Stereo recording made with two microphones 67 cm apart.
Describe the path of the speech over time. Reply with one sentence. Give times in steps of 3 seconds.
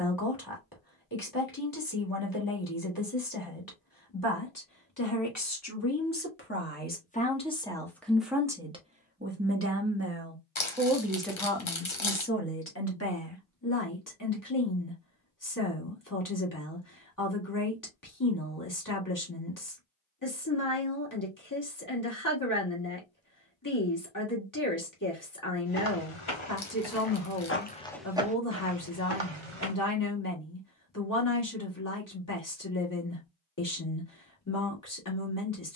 In this clip you hear the speech on the left from 0 s, in the centre from 6 s and on the left from 12 s.